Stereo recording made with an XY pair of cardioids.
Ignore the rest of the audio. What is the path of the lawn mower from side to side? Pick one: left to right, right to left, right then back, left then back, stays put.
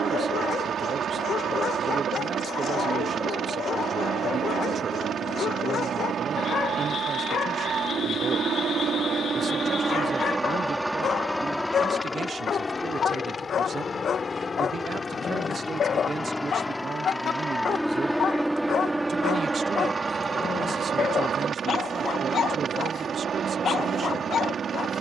left then back.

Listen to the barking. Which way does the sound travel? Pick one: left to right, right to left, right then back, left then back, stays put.
stays put.